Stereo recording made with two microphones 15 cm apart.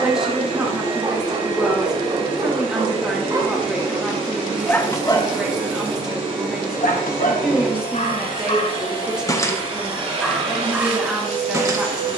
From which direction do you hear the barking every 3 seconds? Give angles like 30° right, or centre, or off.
30° right, 10° left, 50° left, centre.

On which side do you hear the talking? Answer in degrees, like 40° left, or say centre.
10° right.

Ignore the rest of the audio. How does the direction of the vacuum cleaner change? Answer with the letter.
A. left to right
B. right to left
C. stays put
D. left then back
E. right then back
C.